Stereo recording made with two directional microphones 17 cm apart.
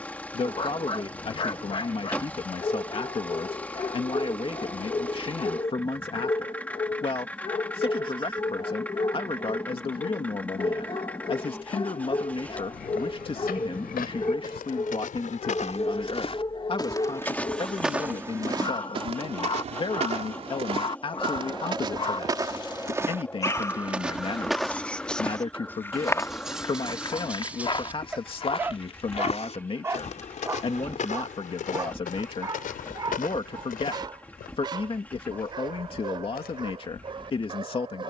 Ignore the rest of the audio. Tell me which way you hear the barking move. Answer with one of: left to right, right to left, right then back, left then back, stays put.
left to right.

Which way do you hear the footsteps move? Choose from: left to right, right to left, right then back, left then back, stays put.
right then back.